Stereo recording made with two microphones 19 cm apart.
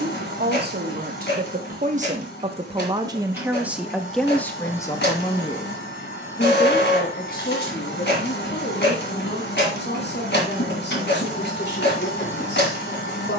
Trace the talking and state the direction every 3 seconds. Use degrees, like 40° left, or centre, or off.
40° right, 10° left, 50° left, 60° left, 70° left.